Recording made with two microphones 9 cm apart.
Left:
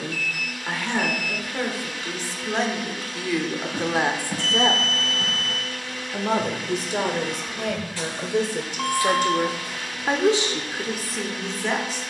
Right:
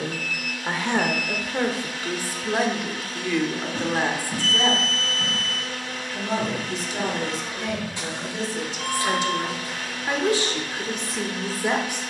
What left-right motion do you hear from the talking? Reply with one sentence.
You can hear the talking move from right to left and back again.